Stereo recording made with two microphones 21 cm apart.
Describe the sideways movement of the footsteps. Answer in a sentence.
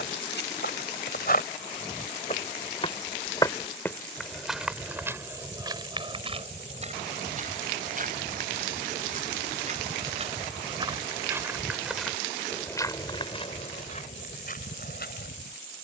In this clip you hear the footsteps go right and come back.